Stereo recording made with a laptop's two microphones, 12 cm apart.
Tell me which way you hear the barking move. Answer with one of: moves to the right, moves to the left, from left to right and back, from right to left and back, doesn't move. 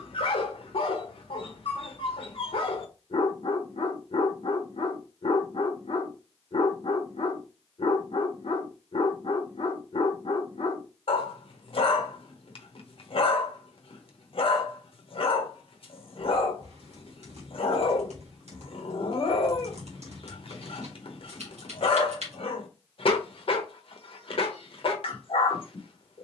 doesn't move.